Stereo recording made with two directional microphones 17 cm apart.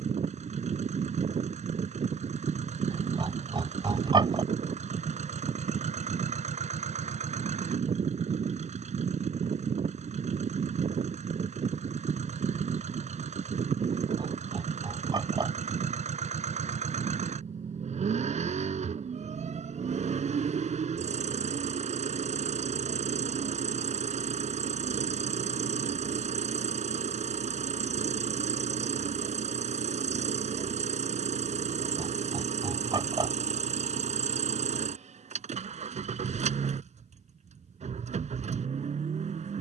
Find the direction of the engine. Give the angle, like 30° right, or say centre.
40° right.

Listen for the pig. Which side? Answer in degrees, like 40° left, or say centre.
30° right.